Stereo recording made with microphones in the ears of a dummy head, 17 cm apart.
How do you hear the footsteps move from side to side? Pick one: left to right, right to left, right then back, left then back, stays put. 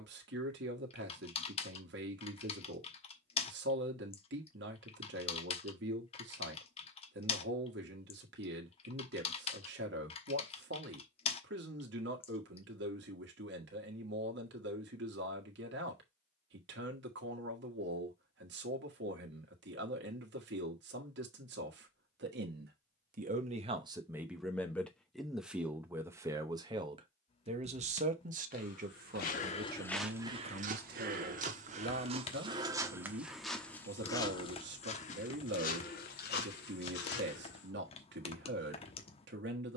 right then back.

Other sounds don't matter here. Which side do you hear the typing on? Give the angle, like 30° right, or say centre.
30° left.